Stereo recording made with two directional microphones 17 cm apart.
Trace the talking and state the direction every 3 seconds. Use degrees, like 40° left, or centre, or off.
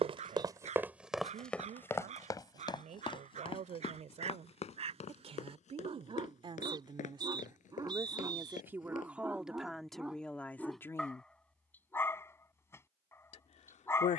50° right, 40° right, 20° right, centre, 50° left.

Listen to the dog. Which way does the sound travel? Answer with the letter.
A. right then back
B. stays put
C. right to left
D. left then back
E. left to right
C.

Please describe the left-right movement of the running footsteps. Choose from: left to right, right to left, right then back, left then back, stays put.
right to left.